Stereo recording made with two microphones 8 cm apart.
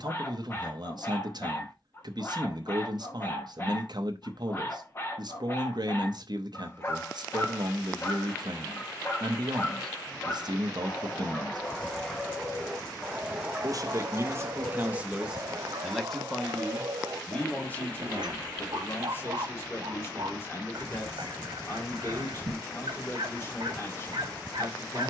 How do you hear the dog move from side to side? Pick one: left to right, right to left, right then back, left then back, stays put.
left to right.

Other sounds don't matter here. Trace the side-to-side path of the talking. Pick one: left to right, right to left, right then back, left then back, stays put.
right to left.